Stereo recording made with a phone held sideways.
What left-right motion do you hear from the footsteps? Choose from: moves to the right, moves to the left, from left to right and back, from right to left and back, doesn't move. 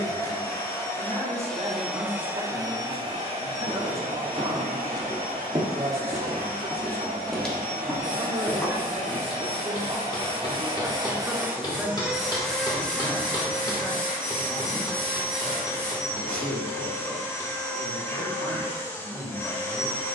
moves to the left.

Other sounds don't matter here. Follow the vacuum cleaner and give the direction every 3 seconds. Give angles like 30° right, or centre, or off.
centre, 60° right, 70° right, 40° right, 10° left, 20° left, 20° left.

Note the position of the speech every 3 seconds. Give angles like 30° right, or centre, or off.
40° right, 40° right, 40° right, 20° right, 10° left, 30° left, 30° left.